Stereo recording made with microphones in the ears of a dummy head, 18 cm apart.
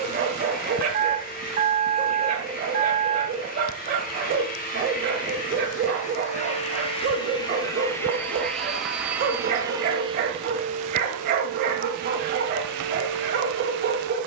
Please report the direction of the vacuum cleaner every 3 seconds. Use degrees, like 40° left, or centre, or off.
50° left, 40° left, 20° left, 30° right, 60° right.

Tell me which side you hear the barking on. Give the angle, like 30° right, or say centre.
50° right.